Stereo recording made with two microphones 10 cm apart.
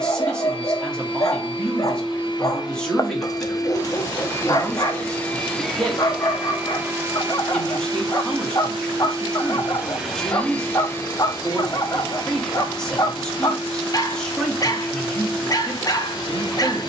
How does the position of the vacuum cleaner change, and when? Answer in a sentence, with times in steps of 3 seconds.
You can hear the vacuum cleaner on the left from 0 s, on the right from 6 s, in the centre from 9 s and on the left from 12 s.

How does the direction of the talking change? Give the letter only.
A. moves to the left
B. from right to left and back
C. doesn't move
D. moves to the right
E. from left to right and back
C.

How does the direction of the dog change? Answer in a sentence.
You can hear the dog stay put.